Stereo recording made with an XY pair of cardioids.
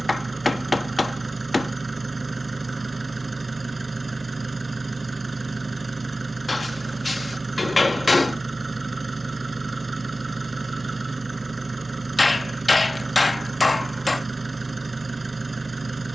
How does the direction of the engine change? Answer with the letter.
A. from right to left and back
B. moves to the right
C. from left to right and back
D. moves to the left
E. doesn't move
E.